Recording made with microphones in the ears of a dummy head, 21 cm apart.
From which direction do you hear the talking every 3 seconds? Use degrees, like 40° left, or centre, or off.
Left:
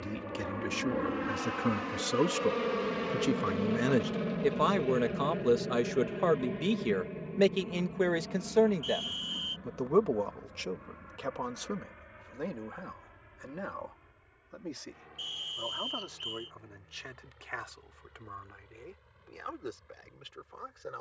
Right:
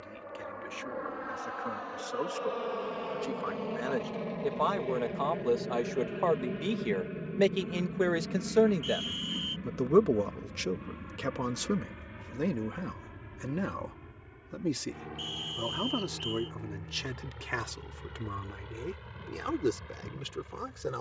60° left, 30° left, centre, 30° right, 40° right, 50° right, 60° right.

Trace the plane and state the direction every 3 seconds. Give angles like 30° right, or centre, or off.
40° left, 10° left, 20° right, 40° right, 50° right, 60° right, 70° right.